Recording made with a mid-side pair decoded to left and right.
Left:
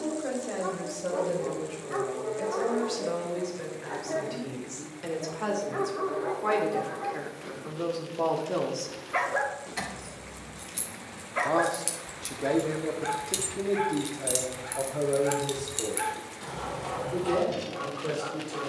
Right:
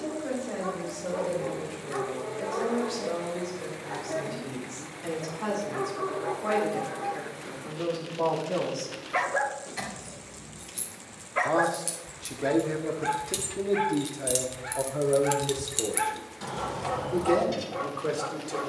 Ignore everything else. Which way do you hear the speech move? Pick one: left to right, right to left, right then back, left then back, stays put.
left to right.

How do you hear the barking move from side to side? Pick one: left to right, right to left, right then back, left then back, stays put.
left to right.